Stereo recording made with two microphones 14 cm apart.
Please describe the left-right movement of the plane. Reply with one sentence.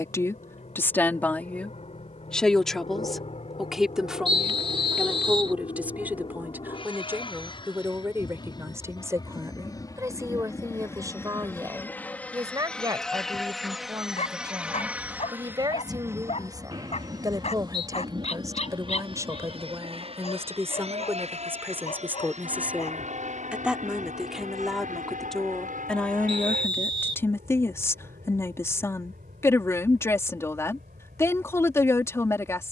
You can hear the plane move from left to right.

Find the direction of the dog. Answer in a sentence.
You can hear the dog on the left.